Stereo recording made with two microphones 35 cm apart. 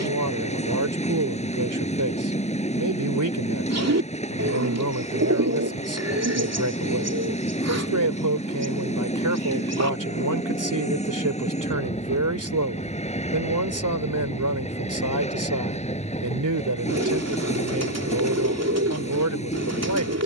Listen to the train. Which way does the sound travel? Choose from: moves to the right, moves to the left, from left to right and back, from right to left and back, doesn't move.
doesn't move.